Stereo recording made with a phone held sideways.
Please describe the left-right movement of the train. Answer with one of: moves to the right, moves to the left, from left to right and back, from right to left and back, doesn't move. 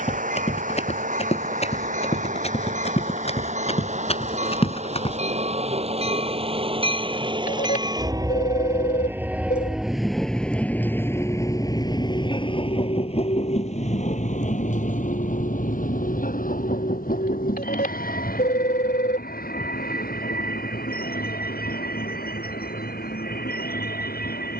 moves to the left.